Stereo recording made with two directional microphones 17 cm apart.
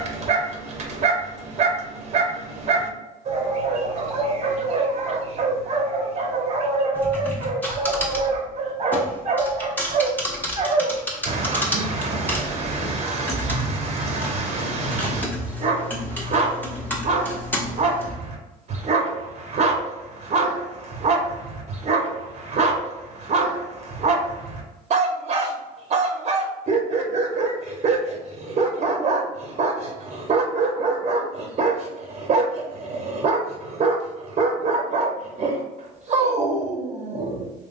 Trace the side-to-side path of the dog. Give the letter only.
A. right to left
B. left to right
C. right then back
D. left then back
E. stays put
E.